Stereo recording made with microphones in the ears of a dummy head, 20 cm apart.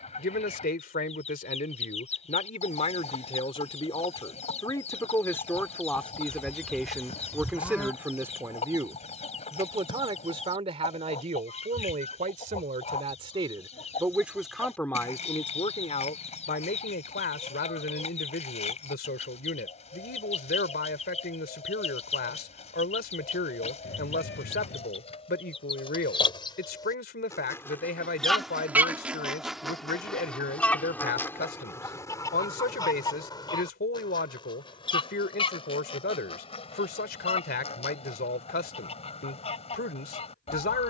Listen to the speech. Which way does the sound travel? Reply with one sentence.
In this clip you hear the speech go right and come back.